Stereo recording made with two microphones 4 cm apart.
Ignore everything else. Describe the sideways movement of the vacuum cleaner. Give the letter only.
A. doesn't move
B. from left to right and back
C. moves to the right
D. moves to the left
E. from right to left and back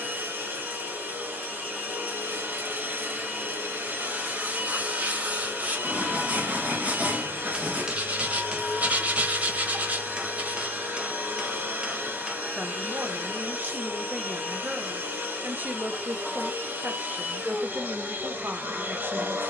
A.